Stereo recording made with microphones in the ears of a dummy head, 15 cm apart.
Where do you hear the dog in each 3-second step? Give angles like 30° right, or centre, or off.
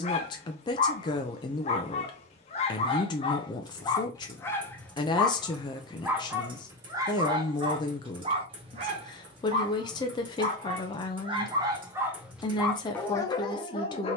40° left, 10° left, 20° right, 40° right, 20° left.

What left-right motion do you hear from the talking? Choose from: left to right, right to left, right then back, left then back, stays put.
stays put.